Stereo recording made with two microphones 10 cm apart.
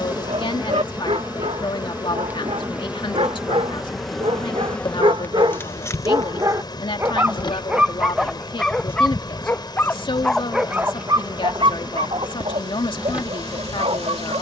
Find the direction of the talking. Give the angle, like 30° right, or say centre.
50° left.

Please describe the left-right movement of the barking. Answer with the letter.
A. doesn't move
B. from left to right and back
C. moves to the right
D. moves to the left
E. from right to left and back
E.